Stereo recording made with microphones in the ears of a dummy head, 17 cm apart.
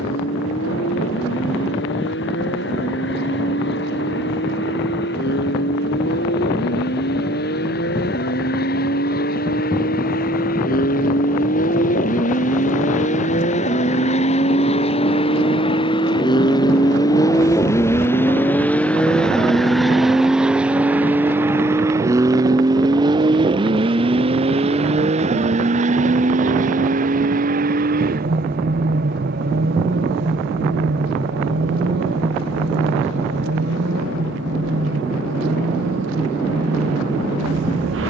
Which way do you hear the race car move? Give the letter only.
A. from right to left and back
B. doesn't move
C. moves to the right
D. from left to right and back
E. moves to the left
C.